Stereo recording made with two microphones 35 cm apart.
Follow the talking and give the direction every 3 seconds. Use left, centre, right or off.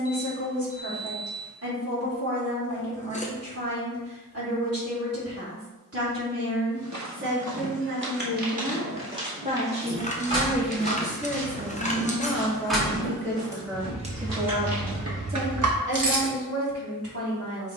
right, right, right, centre, centre, right.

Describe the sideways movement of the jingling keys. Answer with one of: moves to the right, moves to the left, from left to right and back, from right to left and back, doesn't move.
moves to the right.